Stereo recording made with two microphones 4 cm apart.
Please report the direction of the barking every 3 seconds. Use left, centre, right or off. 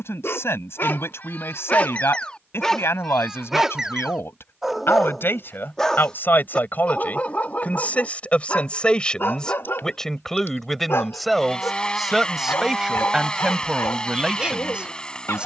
left, centre, left, left, left.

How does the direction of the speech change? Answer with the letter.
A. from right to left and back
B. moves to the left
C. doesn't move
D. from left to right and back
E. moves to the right
E.